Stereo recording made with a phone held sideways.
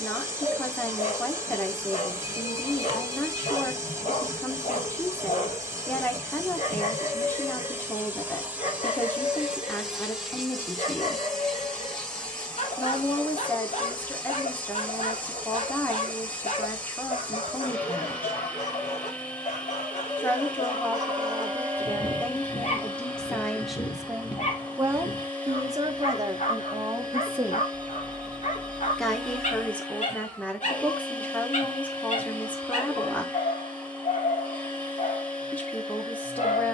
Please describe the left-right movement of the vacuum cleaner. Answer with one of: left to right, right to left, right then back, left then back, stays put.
right to left.